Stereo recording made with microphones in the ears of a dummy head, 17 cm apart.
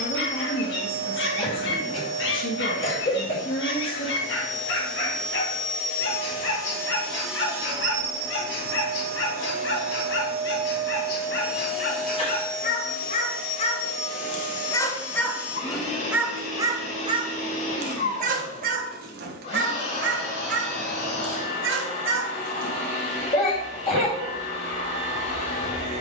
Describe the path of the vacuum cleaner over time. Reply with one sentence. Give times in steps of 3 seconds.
In this clip you hear the vacuum cleaner on the left from 0 s, in the centre from 6 s, on the right from 9 s and on the left from 12 s.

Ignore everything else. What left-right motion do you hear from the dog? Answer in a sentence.
You can hear the dog travel towards the right.